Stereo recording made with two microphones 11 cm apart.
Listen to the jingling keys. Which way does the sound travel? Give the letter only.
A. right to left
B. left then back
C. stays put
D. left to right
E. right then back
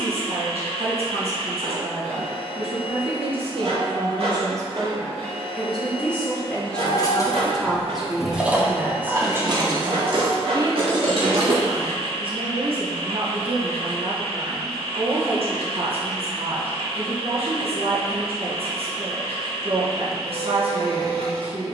D.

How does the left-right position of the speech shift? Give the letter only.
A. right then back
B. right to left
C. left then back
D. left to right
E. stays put
C.